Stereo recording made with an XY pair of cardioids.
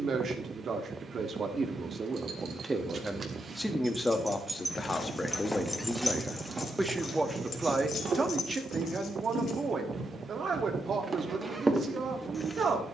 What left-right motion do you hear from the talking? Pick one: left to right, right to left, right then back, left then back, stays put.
left then back.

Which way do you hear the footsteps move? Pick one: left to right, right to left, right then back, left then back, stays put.
right then back.